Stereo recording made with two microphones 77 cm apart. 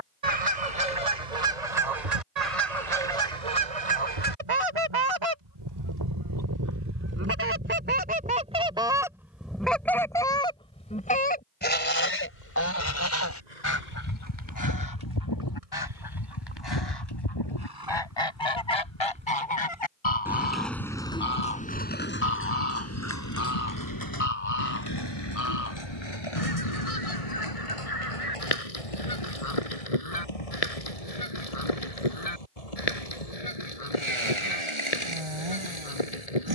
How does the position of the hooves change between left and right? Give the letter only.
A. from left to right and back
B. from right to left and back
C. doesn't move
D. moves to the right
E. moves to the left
E.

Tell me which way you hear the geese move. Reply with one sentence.
In this clip you hear the geese travel towards the left.